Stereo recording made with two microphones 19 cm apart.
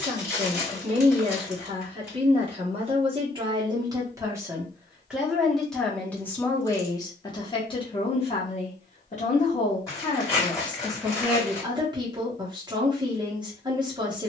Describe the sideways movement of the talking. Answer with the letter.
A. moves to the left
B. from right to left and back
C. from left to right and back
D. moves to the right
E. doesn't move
B.